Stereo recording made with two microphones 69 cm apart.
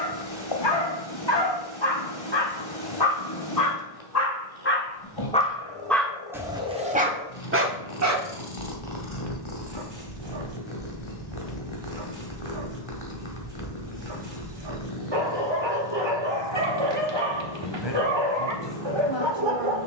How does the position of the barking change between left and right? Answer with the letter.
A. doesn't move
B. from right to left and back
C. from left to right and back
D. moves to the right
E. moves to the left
D.